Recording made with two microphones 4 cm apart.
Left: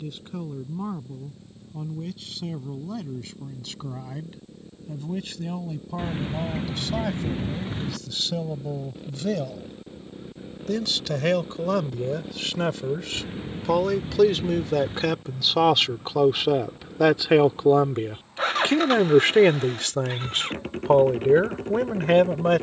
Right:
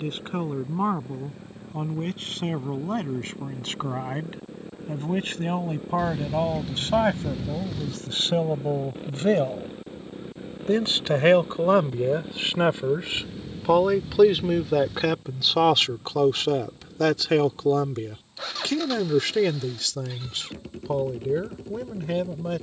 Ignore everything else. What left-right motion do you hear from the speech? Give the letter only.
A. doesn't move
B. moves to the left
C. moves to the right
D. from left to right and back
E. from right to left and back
B.